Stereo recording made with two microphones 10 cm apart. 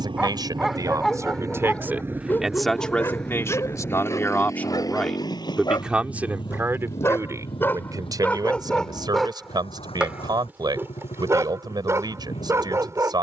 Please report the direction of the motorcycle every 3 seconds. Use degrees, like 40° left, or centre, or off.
30° right, 30° left, 60° left, 70° left, 70° left.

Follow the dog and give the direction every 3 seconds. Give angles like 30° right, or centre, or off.
10° left, 30° left, 20° left, 20° right, 30° right.